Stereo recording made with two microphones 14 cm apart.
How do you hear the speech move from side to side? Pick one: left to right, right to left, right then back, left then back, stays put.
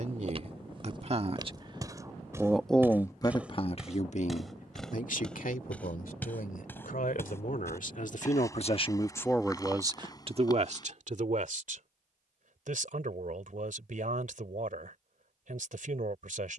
left then back.